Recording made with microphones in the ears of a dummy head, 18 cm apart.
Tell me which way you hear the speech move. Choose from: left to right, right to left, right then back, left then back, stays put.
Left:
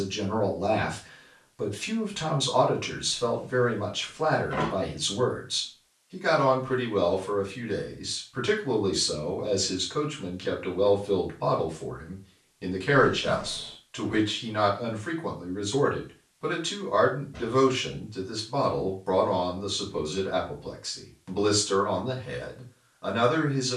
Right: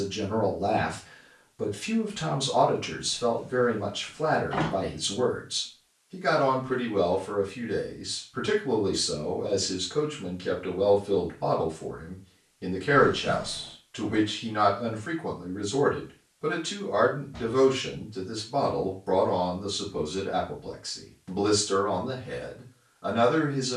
stays put.